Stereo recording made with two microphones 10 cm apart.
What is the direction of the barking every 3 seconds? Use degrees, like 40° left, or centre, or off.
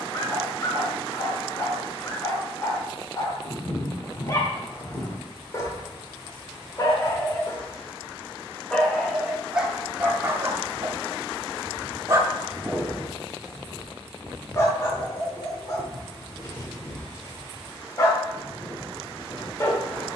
30° left, 30° left, 30° left, 20° right, centre, 30° left, 30° left.